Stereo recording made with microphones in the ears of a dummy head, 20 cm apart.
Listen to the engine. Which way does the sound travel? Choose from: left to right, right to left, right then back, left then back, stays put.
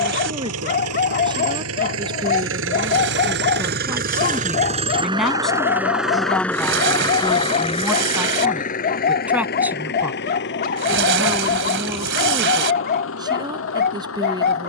right to left.